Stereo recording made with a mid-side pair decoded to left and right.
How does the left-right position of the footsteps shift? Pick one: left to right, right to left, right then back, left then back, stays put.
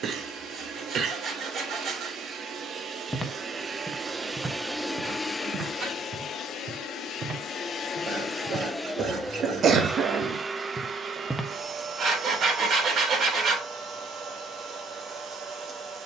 right then back.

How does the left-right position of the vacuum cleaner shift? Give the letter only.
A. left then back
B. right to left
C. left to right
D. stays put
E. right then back
A.